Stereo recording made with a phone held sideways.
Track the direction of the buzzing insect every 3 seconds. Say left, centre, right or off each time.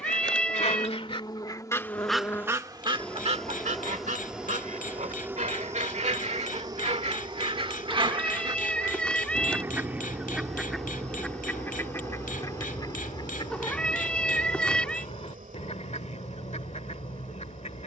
left, centre, right, right, right, right.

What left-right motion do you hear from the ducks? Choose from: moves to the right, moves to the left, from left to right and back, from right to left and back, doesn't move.
from left to right and back.